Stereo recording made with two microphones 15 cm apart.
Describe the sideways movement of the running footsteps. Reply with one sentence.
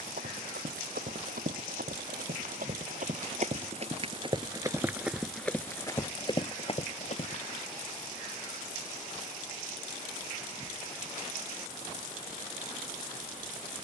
You can hear the running footsteps move to the left.